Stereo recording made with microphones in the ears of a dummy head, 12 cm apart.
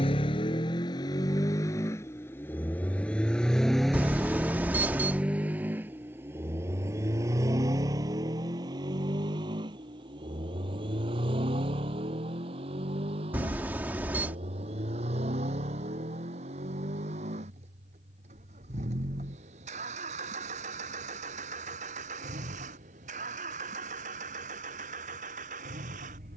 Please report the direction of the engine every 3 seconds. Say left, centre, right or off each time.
left, centre, right, right, right, right, right, right, right.